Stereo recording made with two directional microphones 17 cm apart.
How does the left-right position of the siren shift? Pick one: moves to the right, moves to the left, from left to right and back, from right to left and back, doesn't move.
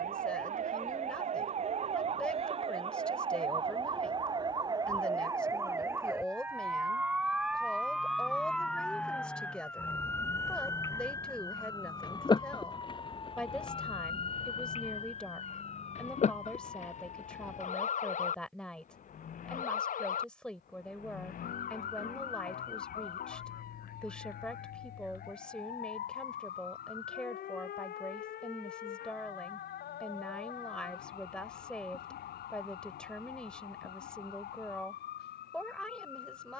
moves to the left.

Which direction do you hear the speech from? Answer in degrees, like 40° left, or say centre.
10° left.